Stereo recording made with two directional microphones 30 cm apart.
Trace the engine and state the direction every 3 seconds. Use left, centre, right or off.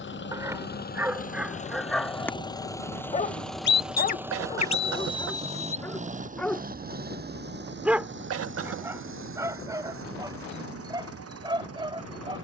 left, centre, right, right.